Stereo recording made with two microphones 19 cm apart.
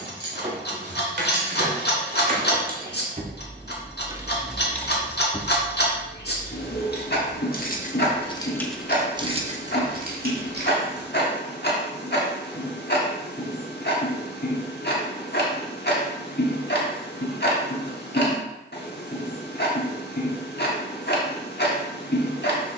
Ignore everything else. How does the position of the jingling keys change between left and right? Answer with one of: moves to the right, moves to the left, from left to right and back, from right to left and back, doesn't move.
from right to left and back.